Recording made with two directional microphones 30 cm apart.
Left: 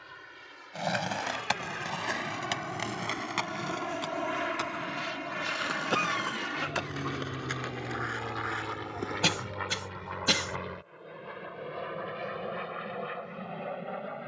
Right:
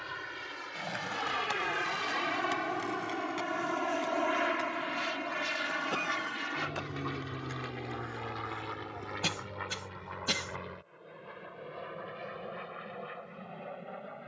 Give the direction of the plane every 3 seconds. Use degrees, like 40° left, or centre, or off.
40° right, 10° right, 20° left, 30° left, 40° left.